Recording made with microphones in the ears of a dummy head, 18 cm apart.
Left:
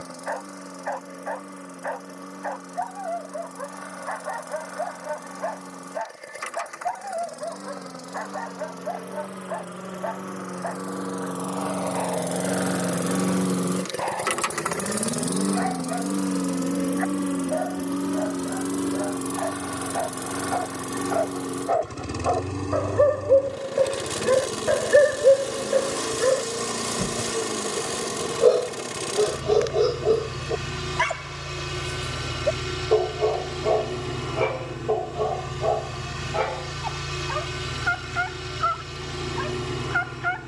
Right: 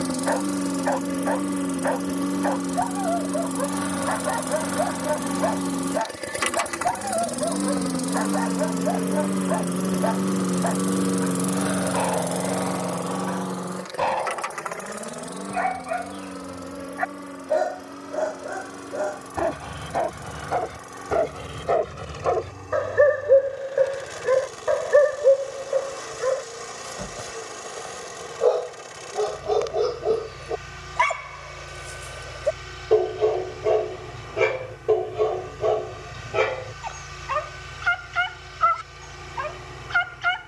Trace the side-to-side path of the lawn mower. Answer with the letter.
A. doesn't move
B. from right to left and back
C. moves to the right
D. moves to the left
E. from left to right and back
D.